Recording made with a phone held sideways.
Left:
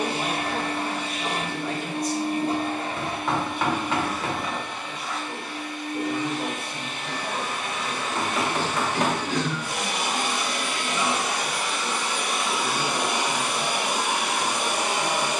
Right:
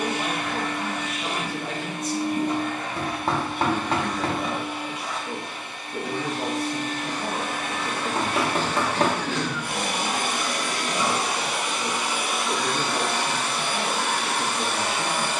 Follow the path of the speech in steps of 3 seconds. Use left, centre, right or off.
centre, right, right, right, right.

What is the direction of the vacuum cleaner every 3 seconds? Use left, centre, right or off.
left, centre, right, right, centre.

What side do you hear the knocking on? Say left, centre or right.
right.